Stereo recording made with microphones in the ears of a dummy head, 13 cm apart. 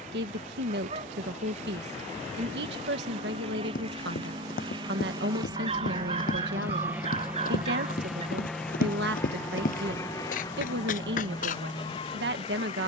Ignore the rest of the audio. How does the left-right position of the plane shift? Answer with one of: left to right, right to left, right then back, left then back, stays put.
right to left.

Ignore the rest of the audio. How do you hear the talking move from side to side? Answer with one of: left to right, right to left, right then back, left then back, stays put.
stays put.